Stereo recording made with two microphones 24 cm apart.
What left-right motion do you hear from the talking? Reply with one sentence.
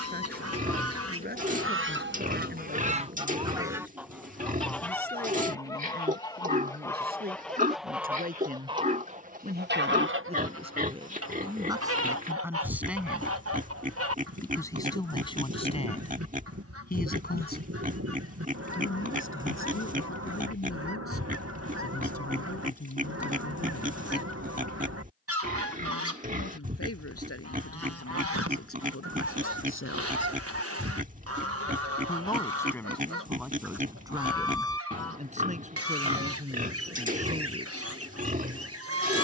You can hear the talking go left and come back.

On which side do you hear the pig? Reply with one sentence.
In this clip you hear the pig on the right.